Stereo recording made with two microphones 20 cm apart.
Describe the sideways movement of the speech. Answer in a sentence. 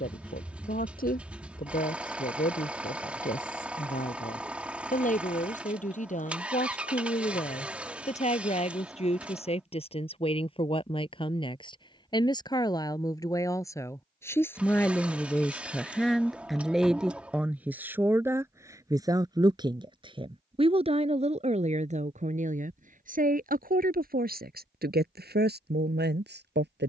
You can hear the speech go from the left side to the right.